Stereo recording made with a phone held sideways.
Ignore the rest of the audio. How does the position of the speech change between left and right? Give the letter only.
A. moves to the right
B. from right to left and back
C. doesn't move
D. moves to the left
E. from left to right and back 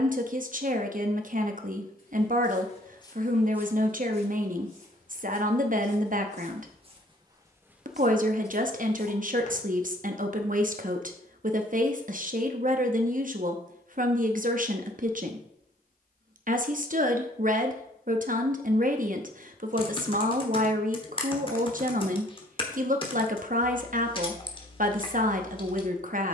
C.